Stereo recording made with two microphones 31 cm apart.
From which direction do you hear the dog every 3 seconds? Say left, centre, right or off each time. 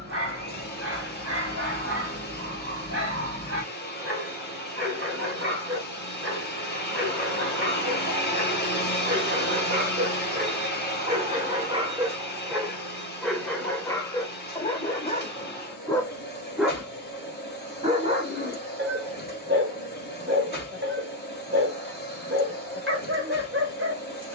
right, right, right, right, centre, centre, right, right.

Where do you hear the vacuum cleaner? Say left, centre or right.
left.